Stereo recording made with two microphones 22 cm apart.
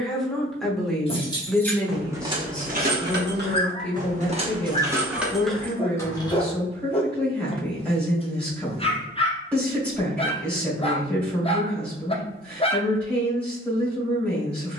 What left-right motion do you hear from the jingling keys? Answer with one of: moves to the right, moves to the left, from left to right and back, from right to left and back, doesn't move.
from left to right and back.